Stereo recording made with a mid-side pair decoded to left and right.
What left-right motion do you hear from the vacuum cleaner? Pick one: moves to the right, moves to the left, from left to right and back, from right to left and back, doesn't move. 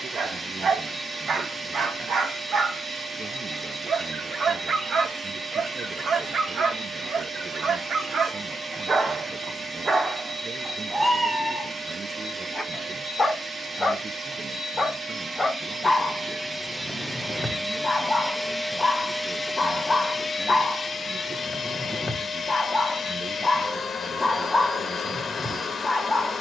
moves to the left.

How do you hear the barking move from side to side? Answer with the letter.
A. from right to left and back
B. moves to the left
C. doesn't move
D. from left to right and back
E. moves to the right
B.